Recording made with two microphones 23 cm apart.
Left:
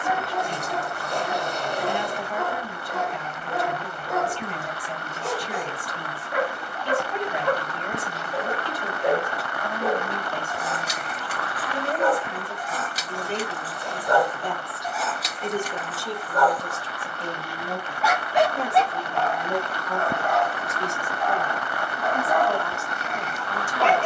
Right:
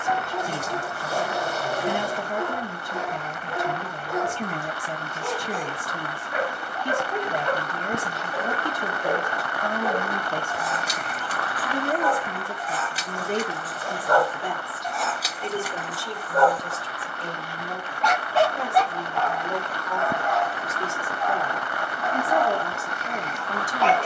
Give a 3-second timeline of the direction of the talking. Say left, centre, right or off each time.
right, right, right, right, right, left, centre, right.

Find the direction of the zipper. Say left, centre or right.
centre.